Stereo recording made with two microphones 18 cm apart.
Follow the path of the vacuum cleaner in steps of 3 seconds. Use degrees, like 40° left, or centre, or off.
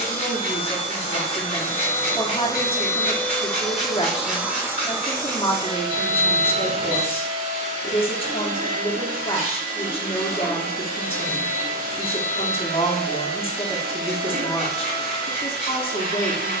30° left, 10° right, 40° right, 60° right, 70° right, 70° right.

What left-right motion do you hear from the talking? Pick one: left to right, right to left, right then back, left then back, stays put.
stays put.